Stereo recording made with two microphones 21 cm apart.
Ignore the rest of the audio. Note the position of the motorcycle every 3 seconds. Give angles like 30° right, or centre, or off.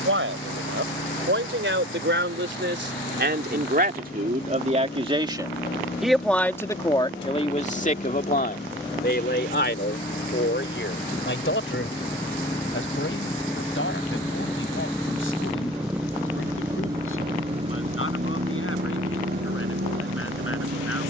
60° left, 60° left, 50° left, 40° left, 20° left, 10° right, 50° right.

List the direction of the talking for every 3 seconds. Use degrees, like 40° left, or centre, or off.
60° right, 40° right, 20° left, 60° left, 70° left, 80° left, 80° left.